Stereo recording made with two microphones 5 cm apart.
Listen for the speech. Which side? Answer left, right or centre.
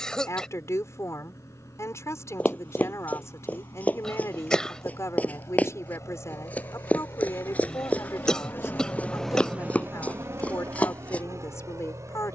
left.